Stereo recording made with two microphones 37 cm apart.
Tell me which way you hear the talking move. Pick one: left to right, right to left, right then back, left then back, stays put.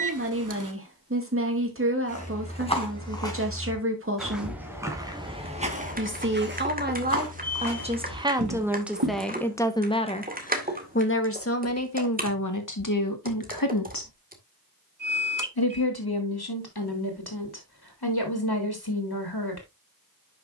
right to left.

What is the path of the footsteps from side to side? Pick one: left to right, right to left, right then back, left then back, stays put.
left to right.